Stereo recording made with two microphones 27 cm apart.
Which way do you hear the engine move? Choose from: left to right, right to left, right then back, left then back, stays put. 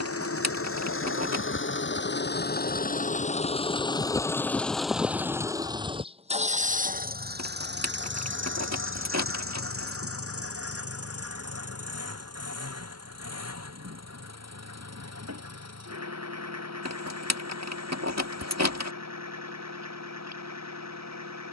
left to right.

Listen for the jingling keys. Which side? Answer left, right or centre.
right.